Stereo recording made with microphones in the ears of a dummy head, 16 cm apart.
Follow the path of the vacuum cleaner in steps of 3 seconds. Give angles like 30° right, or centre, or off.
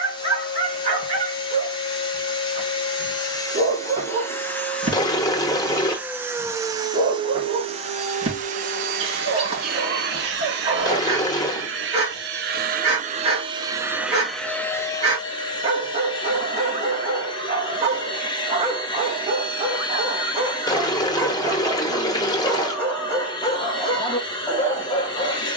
30° left, 10° left, 30° right, 60° right, 20° right, 30° left, 30° left, 30° left, 30° left.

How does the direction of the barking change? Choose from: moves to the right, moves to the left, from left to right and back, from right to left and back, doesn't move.
moves to the left.